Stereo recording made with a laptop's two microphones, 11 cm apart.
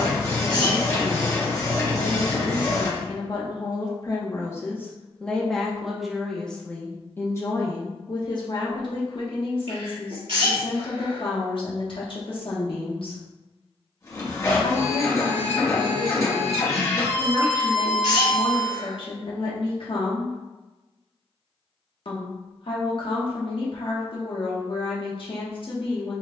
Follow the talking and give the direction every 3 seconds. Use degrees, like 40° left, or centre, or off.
50° left, 20° left, 30° left, 50° left, 50° left, 50° left, 50° left, 50° left, 50° left.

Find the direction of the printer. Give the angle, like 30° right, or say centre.
30° left.